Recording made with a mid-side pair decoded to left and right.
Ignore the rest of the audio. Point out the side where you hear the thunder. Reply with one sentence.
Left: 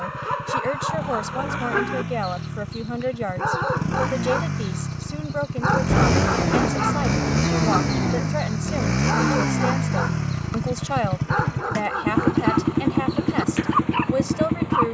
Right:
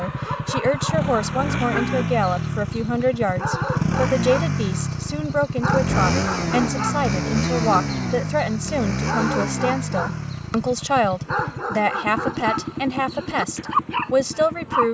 You can hear the thunder on the left.